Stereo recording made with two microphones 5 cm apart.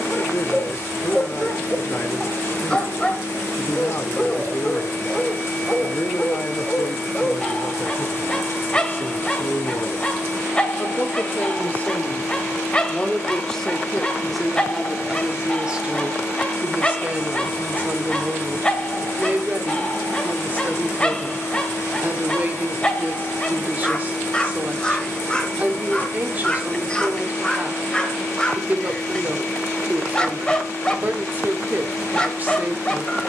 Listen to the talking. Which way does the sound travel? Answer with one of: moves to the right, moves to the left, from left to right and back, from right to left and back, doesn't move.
moves to the right.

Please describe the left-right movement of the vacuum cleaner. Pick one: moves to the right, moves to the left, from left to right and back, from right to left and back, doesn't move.
doesn't move.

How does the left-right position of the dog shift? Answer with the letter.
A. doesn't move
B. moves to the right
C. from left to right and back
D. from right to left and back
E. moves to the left
A.